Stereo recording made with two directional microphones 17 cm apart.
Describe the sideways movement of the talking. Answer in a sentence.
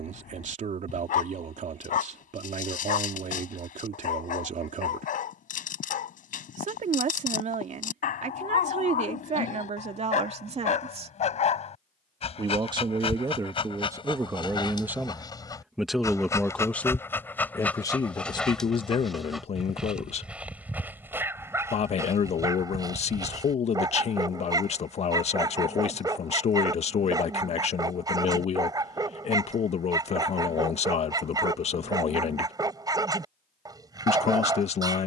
In this clip you hear the talking travel towards the left.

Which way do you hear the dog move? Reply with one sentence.
You can hear the dog go from the left side to the right.